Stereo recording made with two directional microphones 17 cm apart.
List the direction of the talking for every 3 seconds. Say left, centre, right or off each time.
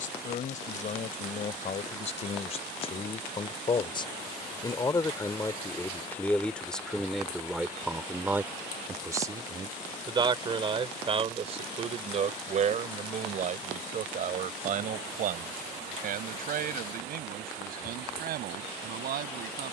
left, left, centre, right, right, right, right.